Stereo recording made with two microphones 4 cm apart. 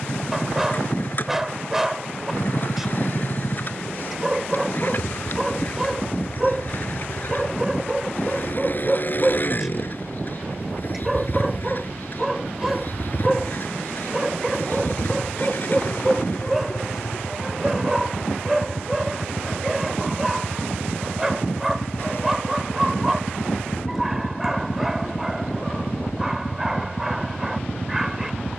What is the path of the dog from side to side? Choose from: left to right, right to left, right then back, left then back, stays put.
stays put.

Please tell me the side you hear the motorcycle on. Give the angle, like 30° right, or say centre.
50° left.